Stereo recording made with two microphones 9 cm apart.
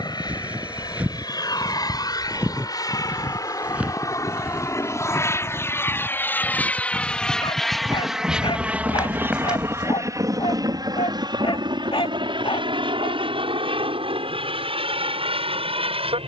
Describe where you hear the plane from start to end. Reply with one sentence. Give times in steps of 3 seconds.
In this clip you hear the plane on the left from 0 s, in the centre from 6 s and on the right from 9 s.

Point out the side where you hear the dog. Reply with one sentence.
You can hear the dog on the left.